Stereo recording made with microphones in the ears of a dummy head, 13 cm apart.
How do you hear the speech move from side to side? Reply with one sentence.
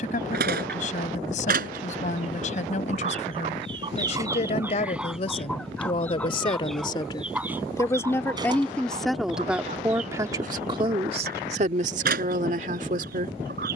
In this clip you hear the speech move to the right.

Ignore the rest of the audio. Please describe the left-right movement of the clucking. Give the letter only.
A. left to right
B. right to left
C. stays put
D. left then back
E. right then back
D.